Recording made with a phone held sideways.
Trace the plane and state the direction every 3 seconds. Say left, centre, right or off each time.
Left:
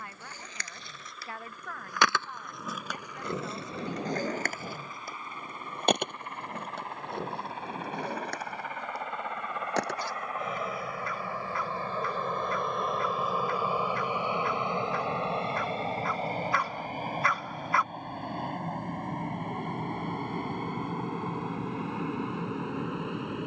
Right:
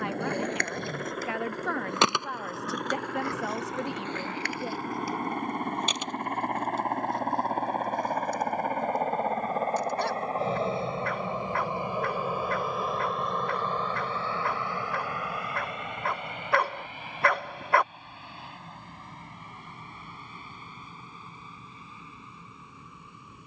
right, right, right, right, centre, left, left, left.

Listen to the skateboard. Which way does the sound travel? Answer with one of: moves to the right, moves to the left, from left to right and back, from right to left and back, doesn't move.
moves to the left.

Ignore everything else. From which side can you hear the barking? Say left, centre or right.
right.